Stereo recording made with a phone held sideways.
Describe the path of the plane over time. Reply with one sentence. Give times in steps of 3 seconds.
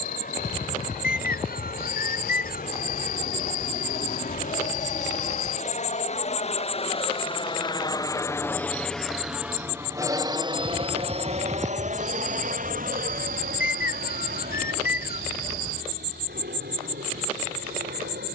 In this clip you hear the plane on the left from 0 s and on the right from 9 s.